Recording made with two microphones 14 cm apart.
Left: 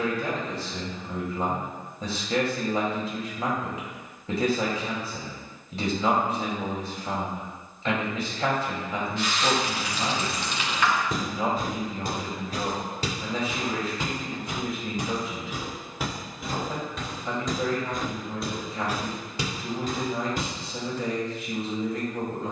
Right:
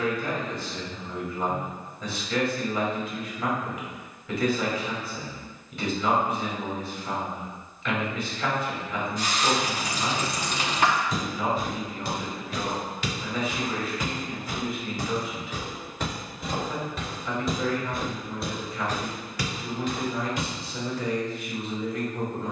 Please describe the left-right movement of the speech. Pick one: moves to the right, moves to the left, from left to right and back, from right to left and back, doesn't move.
doesn't move.